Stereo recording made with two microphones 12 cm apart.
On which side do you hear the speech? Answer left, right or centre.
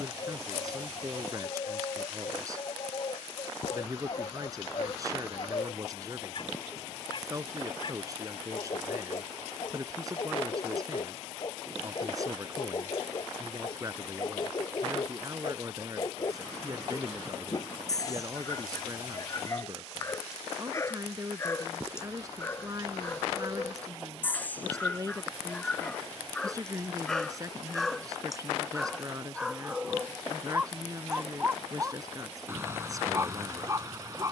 right.